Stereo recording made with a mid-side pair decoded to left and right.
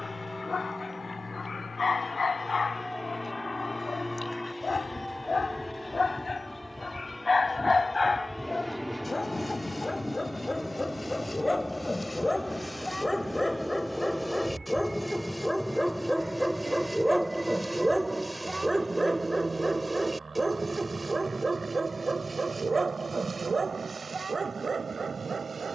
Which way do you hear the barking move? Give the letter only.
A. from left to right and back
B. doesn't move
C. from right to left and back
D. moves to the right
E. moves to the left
D.